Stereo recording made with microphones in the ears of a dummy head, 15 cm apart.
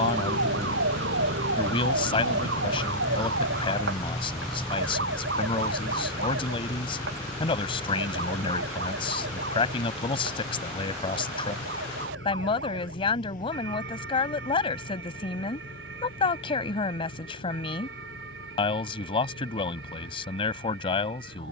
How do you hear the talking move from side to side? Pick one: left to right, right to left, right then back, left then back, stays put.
stays put.